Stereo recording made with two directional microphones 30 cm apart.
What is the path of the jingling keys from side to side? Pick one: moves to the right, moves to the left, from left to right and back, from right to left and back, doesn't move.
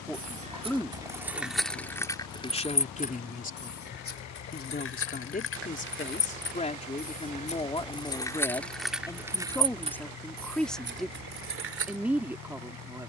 from right to left and back.